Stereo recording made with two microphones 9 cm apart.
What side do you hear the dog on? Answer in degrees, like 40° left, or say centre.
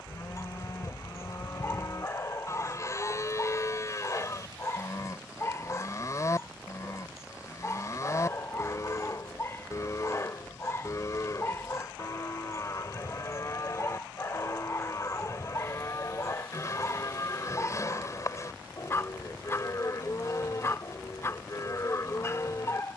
30° left.